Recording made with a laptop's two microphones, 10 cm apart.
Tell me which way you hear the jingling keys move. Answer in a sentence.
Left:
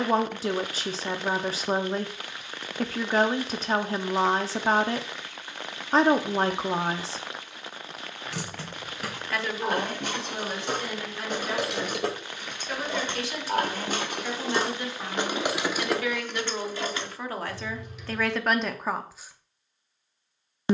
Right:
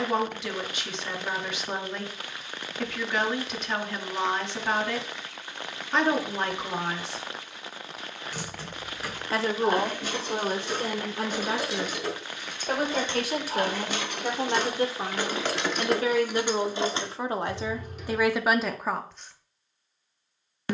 In this clip you hear the jingling keys move from left to right.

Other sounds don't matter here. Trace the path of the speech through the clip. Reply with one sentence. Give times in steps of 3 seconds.
You can hear the speech on the left from 0 s, on the right from 9 s and in the centre from 18 s.